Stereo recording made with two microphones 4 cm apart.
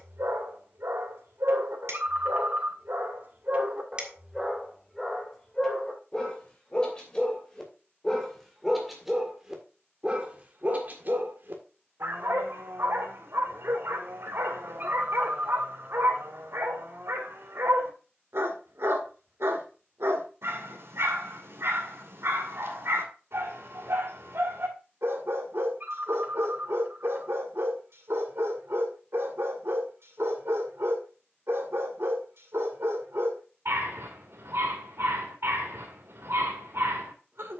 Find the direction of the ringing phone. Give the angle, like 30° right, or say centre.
50° right.